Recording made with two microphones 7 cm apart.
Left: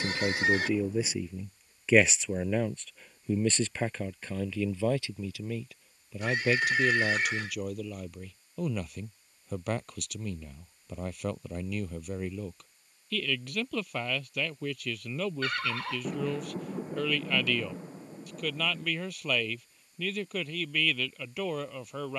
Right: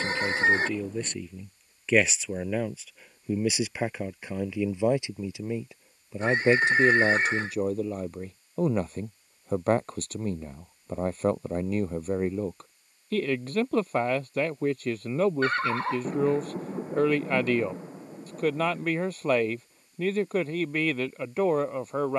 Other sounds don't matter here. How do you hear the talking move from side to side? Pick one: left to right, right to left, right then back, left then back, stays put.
left to right.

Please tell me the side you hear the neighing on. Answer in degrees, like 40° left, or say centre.
30° right.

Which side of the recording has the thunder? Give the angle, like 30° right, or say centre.
10° right.